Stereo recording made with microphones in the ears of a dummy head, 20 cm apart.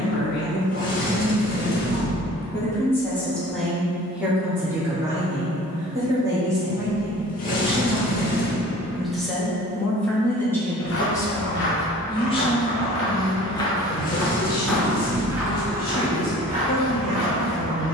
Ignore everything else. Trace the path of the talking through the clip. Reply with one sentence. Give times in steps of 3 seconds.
In this clip you hear the talking on the left from 0 s, in the centre from 3 s and on the left from 12 s.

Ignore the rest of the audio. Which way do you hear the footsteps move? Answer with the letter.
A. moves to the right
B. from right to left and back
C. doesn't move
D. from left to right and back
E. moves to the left
A.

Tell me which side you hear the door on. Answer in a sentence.
You can hear the door on the left.